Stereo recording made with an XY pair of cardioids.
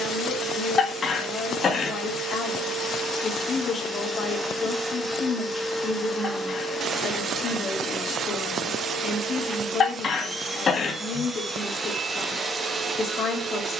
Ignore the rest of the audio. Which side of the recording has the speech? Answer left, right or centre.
left.